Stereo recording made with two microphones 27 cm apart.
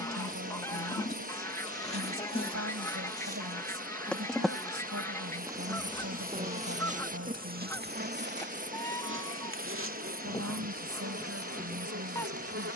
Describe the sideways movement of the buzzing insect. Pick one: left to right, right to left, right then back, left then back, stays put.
left to right.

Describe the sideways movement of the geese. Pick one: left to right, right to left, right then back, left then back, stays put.
stays put.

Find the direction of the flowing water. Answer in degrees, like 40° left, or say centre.
30° right.